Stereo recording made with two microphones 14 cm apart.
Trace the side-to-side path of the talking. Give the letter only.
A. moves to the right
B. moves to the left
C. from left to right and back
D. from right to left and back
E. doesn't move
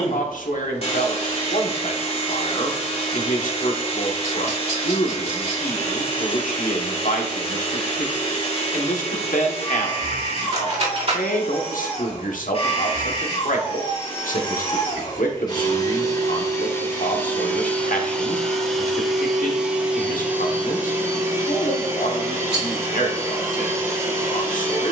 E.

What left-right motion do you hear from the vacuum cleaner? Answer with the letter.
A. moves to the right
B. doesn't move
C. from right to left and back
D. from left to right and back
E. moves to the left
A.